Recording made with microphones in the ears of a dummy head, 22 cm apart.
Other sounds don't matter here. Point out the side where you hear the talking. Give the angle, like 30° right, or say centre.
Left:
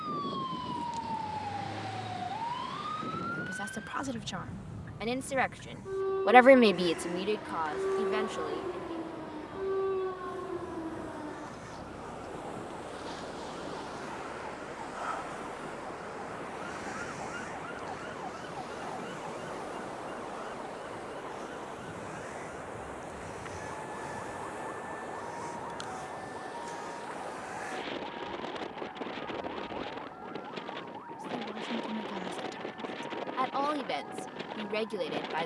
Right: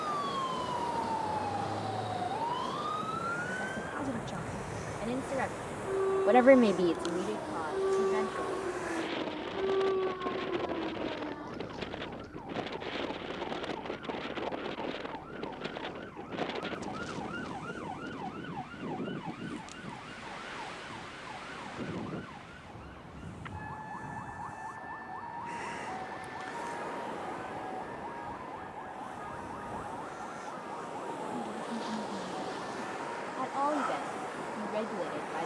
70° left.